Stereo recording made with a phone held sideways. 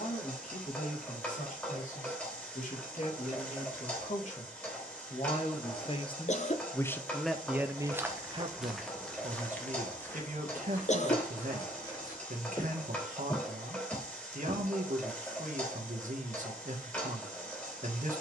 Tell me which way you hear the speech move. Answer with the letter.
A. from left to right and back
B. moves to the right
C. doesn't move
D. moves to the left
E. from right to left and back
B.